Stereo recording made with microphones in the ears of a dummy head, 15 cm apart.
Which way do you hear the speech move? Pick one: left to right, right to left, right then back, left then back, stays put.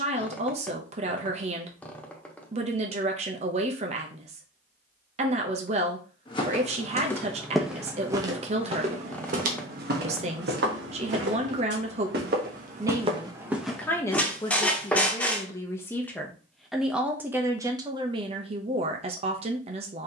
left then back.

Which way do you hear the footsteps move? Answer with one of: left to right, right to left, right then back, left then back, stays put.
right then back.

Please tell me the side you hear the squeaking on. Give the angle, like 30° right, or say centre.
10° left.